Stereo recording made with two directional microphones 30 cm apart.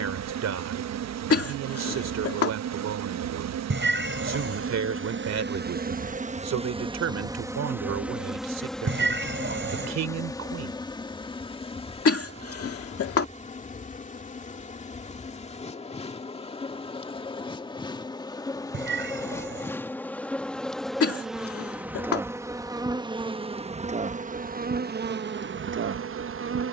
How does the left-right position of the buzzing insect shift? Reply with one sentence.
You can hear the buzzing insect move from right to left and back again.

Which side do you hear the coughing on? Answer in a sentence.
In this clip you hear the coughing on the left.